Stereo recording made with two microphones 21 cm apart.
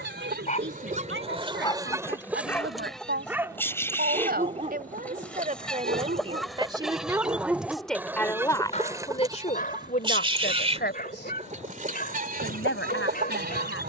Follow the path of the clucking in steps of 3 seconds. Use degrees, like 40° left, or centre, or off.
30° right, 10° left, 10° right, 30° right, 50° right.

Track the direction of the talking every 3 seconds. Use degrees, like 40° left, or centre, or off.
60° right, 40° right, 10° right, 40° left, 70° left.